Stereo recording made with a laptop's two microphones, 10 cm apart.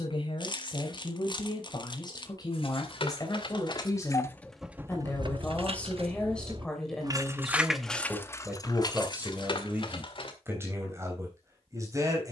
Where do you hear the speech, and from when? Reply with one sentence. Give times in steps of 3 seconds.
You can hear the speech on the left from 0 s, in the centre from 6 s and on the right from 9 s.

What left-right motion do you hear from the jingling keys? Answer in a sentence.
In this clip you hear the jingling keys move from left to right and back again.